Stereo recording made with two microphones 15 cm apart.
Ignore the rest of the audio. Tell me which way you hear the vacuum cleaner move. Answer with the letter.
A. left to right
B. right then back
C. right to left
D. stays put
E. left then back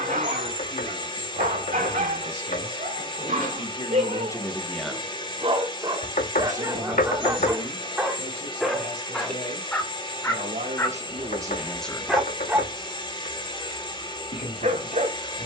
D.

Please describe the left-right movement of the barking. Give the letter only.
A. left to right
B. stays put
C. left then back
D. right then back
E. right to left
C.